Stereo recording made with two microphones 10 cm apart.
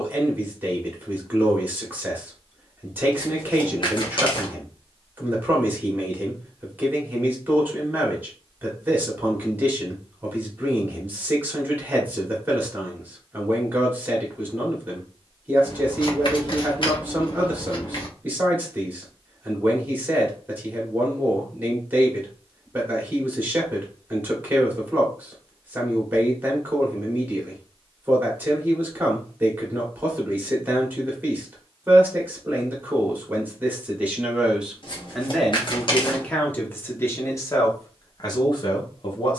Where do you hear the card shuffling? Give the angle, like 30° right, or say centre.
50° left.